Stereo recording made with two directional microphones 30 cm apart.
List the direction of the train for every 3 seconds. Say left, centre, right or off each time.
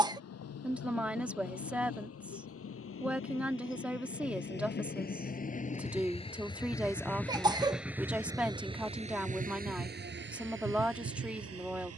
left, left, centre, right.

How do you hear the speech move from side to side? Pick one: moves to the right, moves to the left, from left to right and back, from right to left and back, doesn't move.
doesn't move.